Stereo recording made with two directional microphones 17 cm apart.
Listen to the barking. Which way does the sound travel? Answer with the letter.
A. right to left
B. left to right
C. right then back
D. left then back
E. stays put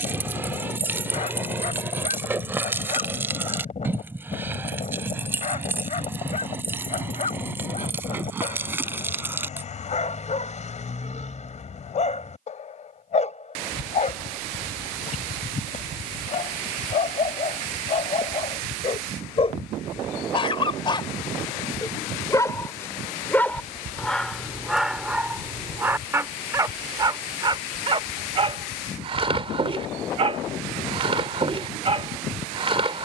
B.